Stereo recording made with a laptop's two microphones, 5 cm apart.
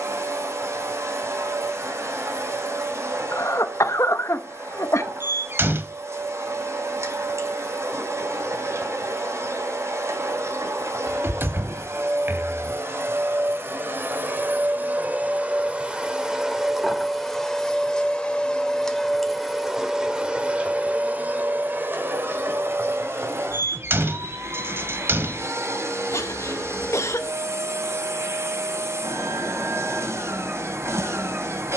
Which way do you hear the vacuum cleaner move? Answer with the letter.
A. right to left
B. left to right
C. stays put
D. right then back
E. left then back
E.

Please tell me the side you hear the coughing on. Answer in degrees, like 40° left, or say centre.
80° left.